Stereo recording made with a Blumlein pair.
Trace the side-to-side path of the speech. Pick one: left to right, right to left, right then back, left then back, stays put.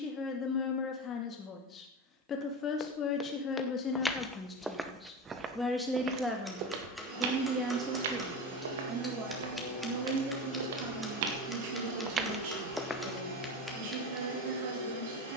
left to right.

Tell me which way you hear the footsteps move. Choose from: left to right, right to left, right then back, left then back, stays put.
right then back.